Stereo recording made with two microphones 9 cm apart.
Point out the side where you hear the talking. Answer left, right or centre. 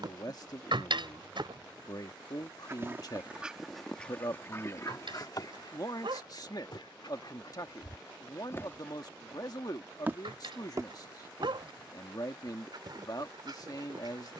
left.